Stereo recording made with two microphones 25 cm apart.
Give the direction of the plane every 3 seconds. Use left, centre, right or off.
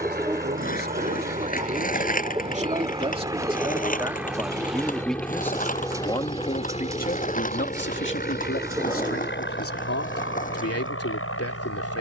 right, centre, left, left.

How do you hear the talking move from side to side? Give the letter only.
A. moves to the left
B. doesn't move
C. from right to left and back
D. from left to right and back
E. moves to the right
A.